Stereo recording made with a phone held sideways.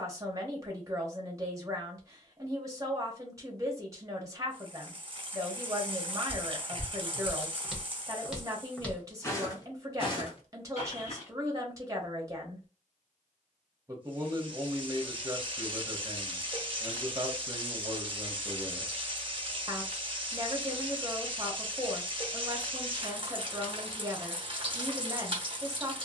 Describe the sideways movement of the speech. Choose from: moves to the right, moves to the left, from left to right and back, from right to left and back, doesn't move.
doesn't move.